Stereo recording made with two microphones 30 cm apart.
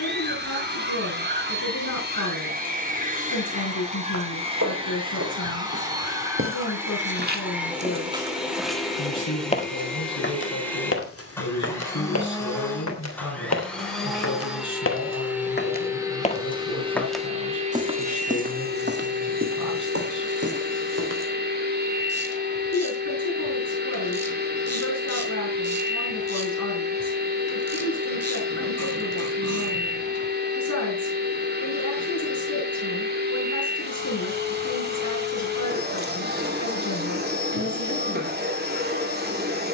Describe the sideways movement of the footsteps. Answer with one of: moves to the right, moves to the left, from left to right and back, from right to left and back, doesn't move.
from right to left and back.